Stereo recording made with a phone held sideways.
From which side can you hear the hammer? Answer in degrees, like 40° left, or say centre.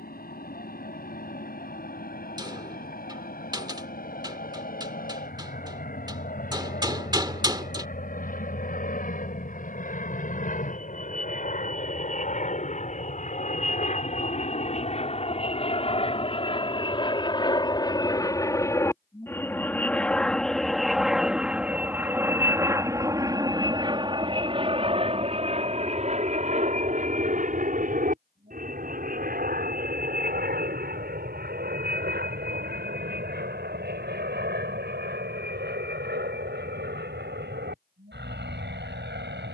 20° right.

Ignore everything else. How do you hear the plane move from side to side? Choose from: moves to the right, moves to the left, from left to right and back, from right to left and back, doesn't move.
moves to the right.